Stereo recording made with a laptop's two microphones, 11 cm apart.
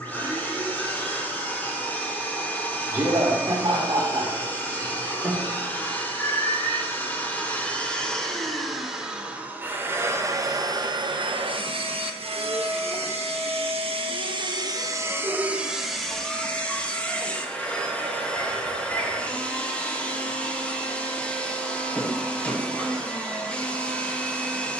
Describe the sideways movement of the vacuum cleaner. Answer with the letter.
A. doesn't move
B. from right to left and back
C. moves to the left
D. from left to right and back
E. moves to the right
D.